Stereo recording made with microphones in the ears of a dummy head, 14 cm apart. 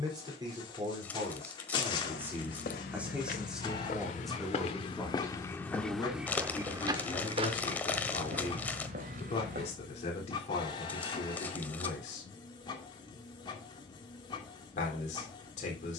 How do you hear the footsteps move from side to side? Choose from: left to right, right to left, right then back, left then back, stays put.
left to right.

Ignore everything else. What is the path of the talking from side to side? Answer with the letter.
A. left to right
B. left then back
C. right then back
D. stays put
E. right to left
E.